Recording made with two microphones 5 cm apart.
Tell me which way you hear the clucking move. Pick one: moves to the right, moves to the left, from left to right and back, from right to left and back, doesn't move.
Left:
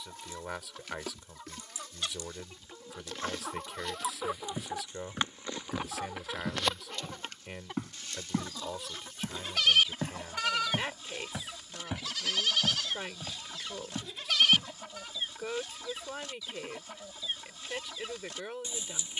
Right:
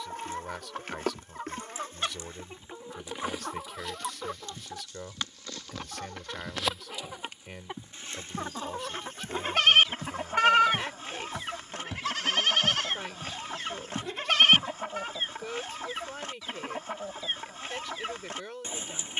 from right to left and back.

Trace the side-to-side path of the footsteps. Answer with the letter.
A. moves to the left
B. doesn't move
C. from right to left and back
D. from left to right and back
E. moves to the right
E.